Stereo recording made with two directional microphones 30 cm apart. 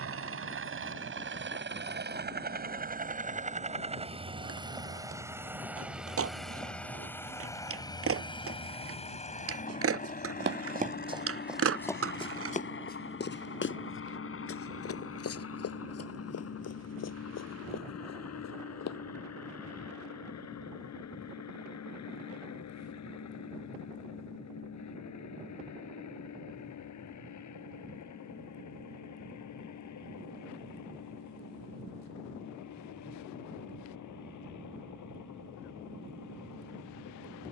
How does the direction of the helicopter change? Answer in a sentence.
In this clip you hear the helicopter move to the left.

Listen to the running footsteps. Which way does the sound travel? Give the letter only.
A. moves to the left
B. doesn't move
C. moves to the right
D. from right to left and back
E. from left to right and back
A.